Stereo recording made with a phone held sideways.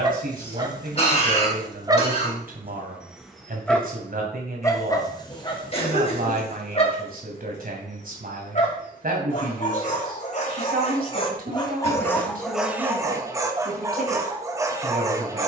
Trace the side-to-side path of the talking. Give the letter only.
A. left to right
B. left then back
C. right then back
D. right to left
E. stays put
E.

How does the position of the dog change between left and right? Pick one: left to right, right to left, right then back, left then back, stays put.
left then back.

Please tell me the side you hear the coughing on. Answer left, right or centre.
left.